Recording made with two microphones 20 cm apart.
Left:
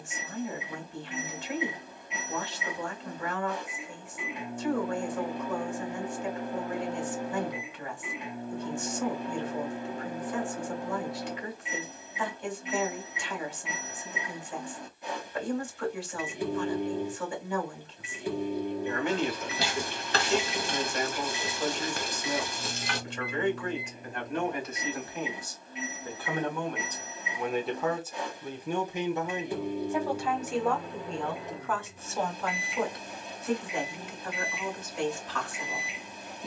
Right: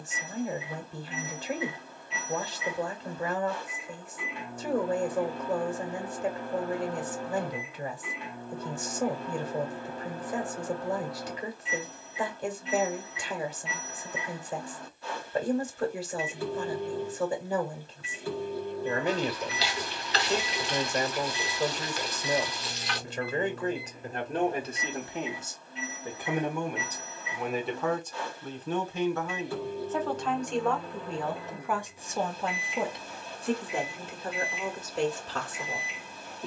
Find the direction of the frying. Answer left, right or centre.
left.